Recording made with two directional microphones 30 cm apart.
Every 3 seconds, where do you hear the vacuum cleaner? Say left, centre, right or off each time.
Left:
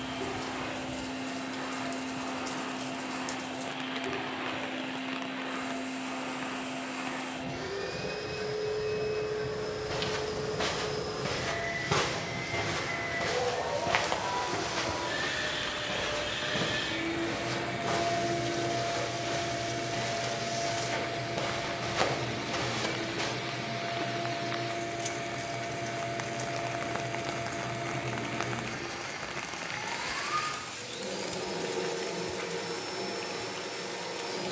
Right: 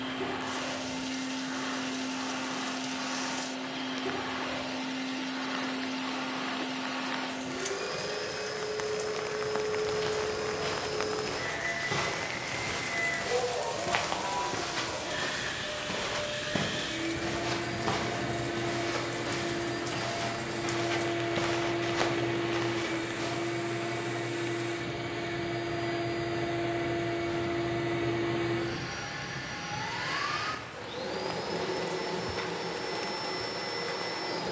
right, right, right, right, centre, left, right, right, right, right, right, right.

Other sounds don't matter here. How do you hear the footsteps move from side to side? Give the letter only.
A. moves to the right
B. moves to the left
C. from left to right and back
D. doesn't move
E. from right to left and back
C.